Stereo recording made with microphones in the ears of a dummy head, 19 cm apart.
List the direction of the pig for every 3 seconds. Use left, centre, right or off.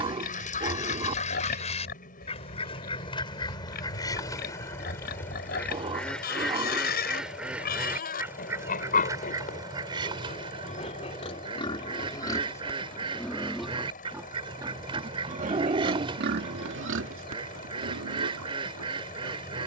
left, left, left, left, centre, right, right.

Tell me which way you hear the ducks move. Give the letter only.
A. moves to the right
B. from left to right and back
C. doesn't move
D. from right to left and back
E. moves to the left
A.